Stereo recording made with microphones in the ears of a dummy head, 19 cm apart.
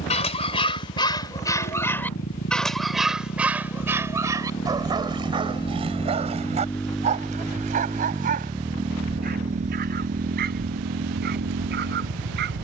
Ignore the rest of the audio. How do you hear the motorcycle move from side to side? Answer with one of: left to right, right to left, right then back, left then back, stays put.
left to right.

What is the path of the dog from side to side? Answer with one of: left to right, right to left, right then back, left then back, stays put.
left to right.